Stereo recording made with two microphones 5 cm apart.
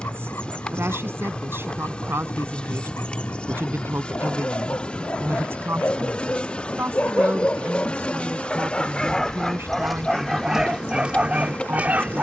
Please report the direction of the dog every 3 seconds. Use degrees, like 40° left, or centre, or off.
50° left, 40° left, 30° left, 10° right.